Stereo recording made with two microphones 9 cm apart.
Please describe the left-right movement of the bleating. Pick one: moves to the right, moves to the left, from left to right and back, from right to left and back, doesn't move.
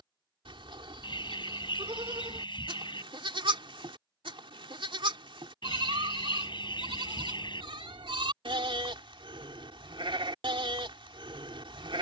doesn't move.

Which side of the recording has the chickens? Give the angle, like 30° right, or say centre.
70° left.